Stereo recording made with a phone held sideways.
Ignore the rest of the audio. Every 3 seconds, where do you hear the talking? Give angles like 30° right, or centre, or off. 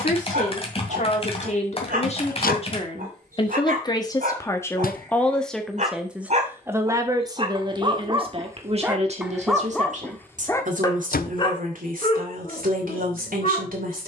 50° left, 20° left, 30° right, 60° right, 70° right.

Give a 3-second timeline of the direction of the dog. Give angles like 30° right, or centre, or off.
70° right, 60° right, 30° right, 10° left, 50° left.